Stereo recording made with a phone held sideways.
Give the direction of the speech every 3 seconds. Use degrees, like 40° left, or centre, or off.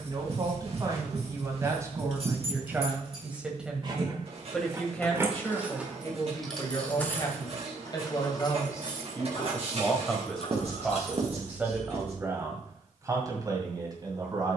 20° right, centre, 30° left, centre, 30° right.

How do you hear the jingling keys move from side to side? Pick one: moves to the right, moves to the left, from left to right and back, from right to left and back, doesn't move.
moves to the left.